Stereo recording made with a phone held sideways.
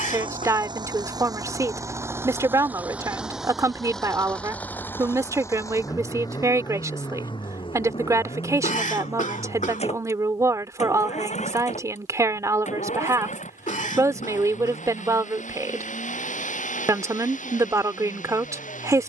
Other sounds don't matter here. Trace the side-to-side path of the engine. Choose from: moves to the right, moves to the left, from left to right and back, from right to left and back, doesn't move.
moves to the left.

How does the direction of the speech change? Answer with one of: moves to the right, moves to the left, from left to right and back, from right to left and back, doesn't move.
doesn't move.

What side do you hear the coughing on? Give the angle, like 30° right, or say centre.
70° left.